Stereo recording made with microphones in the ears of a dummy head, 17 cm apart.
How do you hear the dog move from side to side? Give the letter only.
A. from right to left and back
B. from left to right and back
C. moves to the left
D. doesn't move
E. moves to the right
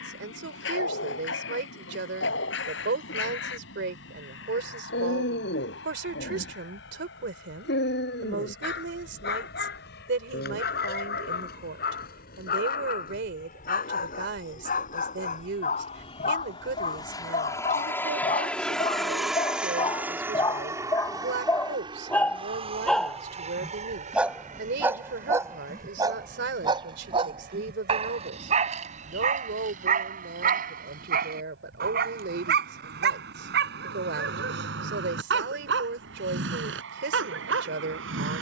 E.